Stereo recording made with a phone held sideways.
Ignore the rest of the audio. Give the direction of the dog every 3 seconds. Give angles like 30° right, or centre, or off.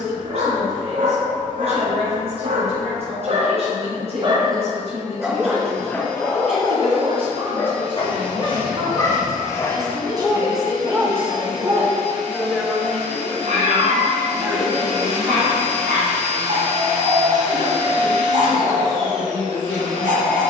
70° right, 20° right, 30° left, centre, 60° right, 70° right, 70° right.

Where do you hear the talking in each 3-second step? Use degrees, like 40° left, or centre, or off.
50° right, 50° right, 40° right, 20° right, centre, 30° right, 50° right.